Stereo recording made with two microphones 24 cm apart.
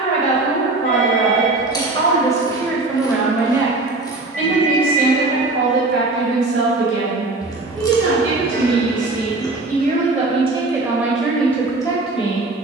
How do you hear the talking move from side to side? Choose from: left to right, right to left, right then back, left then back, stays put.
right then back.